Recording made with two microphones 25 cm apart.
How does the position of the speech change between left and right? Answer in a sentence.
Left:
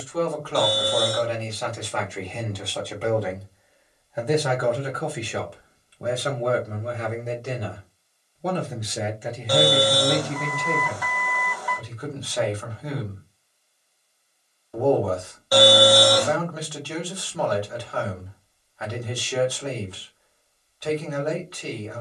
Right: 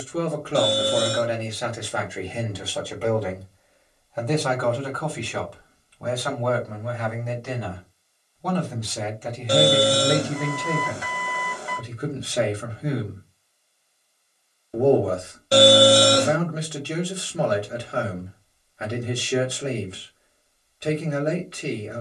In this clip you hear the speech move from right to left and back again.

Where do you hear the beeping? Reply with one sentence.
You can hear the beeping on the right.